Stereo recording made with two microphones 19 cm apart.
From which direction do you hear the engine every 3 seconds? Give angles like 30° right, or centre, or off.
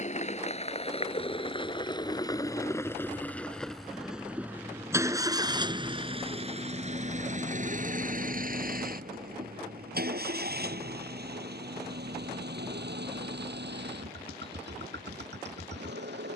30° left, 10° right, 40° right, 60° right, 70° right, 80° right.